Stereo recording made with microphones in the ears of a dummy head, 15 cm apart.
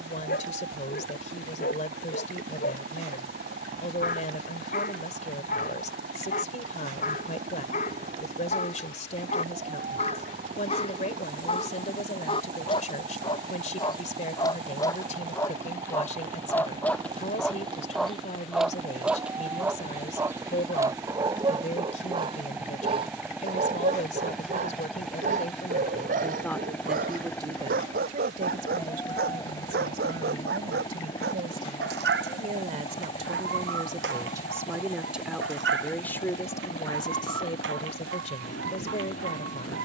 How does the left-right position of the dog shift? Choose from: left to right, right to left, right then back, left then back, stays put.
left to right.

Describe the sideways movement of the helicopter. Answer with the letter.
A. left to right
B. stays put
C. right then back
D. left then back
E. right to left
E.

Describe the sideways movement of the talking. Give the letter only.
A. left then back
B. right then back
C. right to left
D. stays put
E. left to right
B.